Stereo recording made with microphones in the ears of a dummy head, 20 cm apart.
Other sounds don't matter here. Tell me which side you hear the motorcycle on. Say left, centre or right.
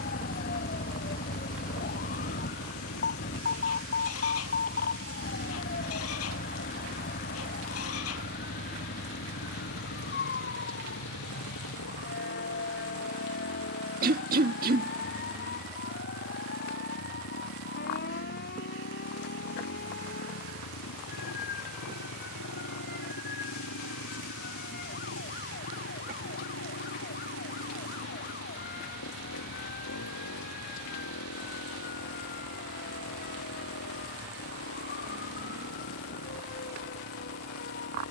left.